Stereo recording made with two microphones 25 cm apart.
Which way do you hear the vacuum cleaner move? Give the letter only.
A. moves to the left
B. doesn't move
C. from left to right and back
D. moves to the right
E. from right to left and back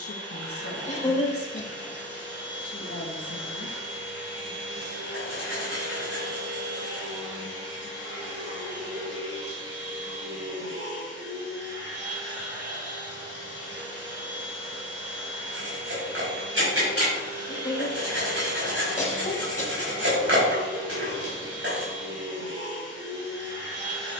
B.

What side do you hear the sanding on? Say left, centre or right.
right.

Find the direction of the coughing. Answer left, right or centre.
left.